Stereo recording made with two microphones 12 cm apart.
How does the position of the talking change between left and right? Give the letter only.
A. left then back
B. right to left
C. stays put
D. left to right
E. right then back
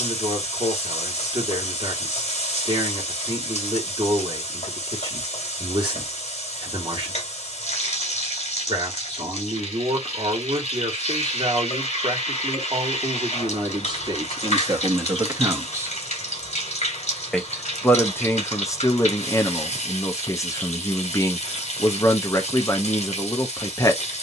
B.